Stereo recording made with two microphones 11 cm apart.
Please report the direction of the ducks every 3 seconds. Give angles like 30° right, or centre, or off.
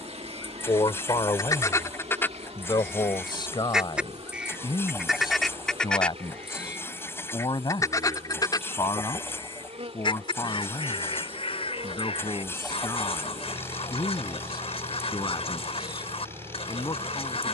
30° left, centre, 30° left, 60° left, 60° left, 60° left.